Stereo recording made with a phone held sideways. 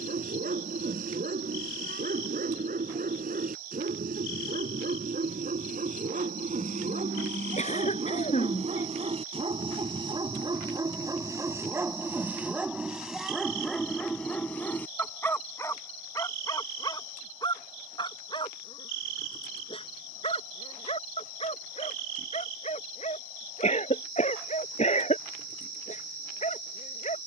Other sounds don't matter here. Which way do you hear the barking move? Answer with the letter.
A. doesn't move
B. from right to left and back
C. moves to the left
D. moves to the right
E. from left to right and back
C.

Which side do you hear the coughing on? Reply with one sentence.
In this clip you hear the coughing on the left.